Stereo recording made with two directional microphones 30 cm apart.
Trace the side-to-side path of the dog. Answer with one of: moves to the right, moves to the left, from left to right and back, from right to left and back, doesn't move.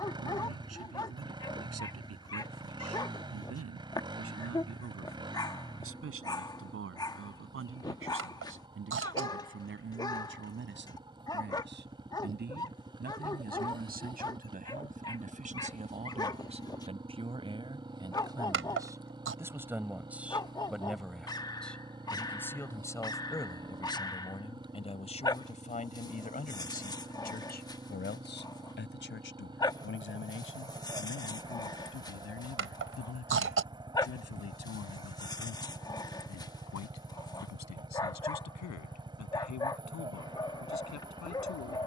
doesn't move.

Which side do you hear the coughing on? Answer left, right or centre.
right.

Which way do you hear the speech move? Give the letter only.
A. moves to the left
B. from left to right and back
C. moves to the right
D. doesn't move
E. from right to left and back
A.